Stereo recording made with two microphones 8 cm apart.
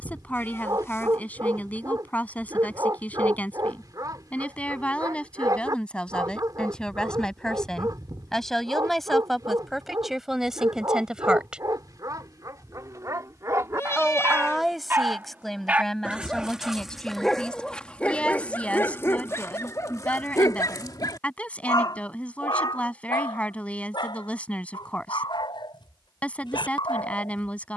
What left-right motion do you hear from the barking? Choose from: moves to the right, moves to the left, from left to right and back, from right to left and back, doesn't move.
moves to the left.